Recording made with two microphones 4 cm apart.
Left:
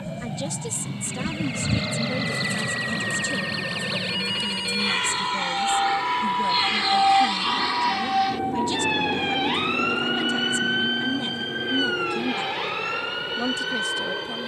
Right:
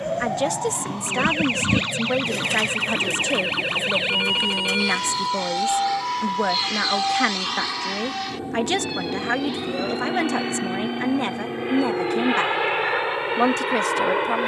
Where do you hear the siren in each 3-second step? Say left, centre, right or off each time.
right, right, left, left, left.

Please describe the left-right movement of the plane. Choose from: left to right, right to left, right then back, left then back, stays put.
left to right.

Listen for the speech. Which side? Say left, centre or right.
right.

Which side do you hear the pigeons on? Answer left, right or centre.
right.